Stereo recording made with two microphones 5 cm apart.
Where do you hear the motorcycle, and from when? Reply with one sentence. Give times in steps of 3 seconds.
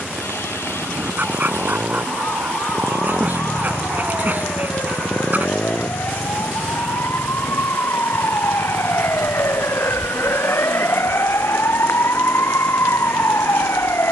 You can hear the motorcycle on the right from 0 s, in the centre from 3 s and on the left from 6 s.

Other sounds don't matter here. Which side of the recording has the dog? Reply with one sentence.
In this clip you hear the dog on the right.